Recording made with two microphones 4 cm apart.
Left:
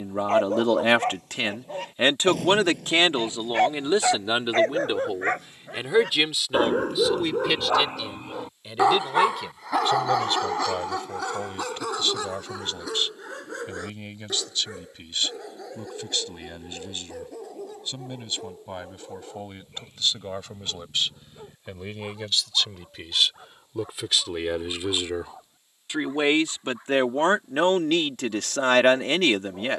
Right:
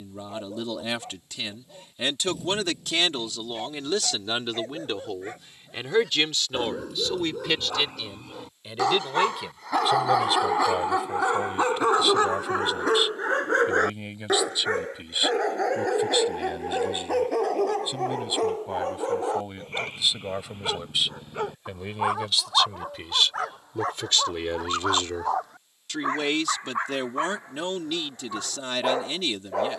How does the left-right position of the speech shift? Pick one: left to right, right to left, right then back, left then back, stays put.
right then back.